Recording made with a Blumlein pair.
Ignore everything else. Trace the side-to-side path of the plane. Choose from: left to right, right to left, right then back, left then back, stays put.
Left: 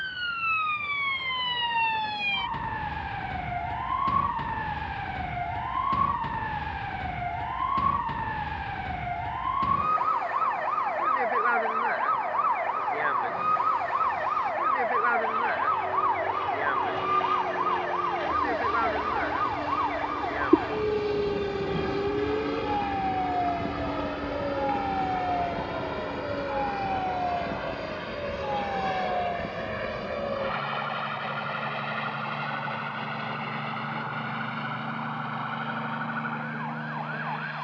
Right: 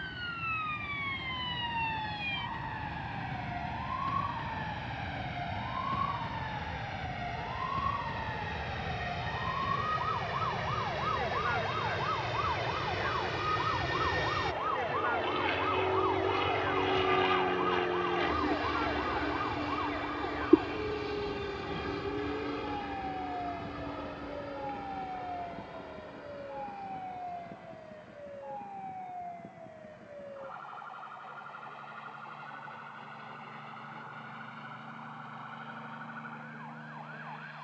right to left.